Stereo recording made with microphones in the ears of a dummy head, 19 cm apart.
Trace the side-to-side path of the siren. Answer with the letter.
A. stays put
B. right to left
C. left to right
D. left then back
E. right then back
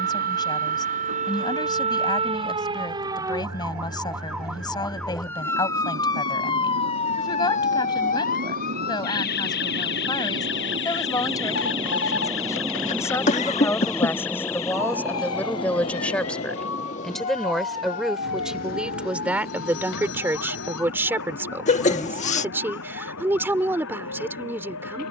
B.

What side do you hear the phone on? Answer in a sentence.
You can hear the phone on the left.